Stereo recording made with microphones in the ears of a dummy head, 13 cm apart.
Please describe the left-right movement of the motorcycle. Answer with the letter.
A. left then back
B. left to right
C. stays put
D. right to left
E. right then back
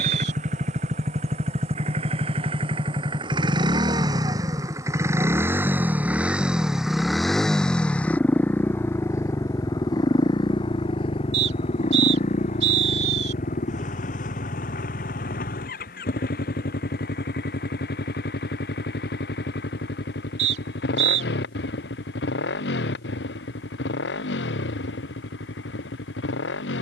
D.